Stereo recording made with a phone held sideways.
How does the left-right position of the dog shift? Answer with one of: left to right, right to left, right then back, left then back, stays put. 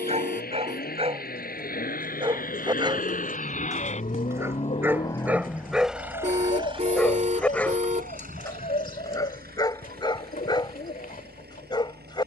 right to left.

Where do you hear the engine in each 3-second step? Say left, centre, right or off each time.
left, left, right, right.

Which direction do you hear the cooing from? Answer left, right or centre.
left.